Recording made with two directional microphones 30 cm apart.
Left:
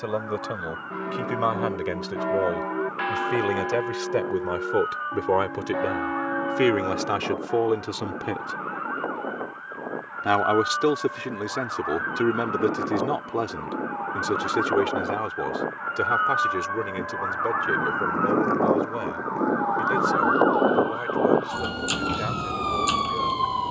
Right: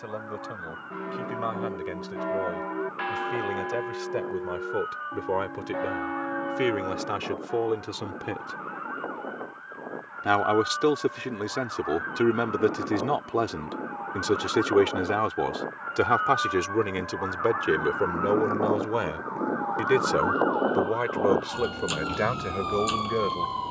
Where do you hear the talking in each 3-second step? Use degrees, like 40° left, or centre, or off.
50° left, 40° left, 30° left, 10° left, 10° right, 30° right, 40° right, 50° right.